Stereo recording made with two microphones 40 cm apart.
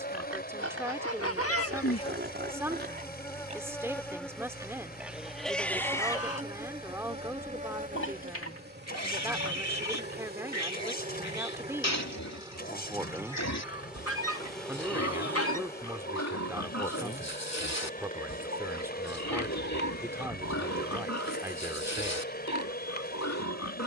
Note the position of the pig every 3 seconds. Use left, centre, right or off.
right, centre, left, left, left, left, left, left.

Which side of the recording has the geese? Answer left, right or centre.
left.